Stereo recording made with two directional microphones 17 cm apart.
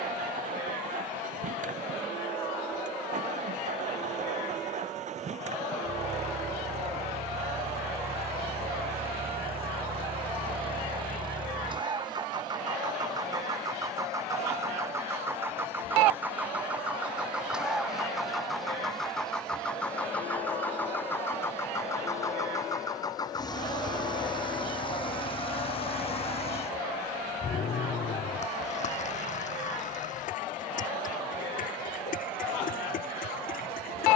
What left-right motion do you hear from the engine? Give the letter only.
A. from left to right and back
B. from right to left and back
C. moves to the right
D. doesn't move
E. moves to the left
E.